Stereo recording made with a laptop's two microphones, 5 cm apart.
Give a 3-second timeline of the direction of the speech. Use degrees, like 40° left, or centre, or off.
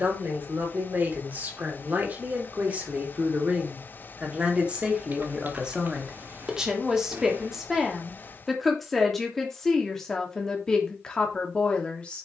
40° right, 30° right, 10° right, 10° left.